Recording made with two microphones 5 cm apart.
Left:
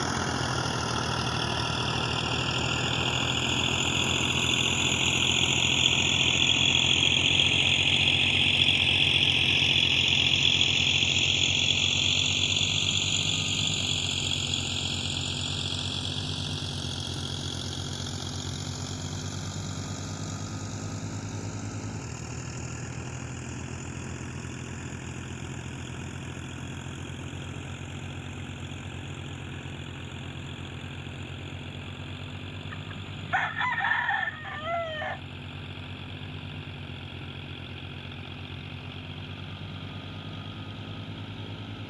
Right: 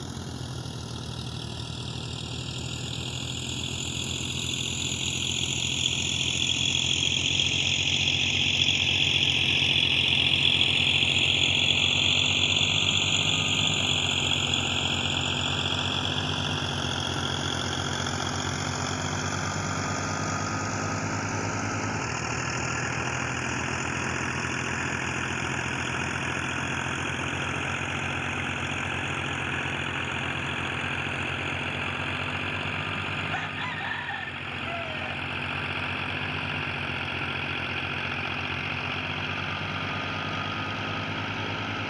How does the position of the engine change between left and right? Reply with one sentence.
You can hear the engine move to the right.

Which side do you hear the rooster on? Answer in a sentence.
In this clip you hear the rooster on the left.